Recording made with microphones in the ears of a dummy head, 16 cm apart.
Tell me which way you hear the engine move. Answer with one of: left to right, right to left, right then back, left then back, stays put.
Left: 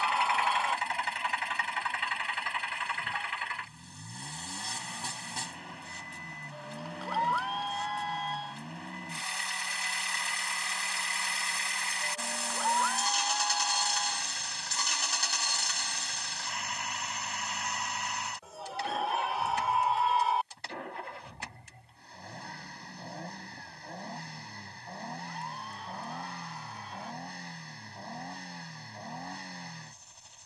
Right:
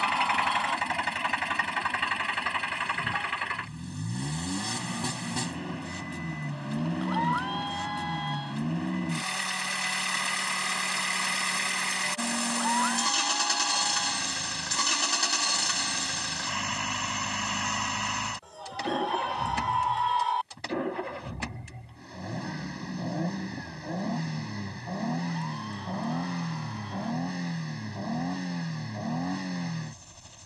stays put.